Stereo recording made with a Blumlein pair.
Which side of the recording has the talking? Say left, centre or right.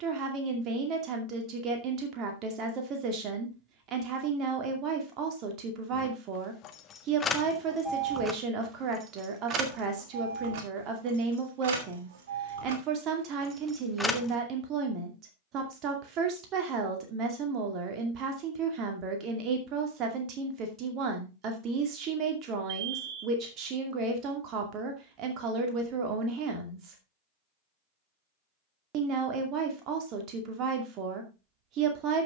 right.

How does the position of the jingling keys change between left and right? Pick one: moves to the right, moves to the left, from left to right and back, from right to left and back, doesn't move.
from left to right and back.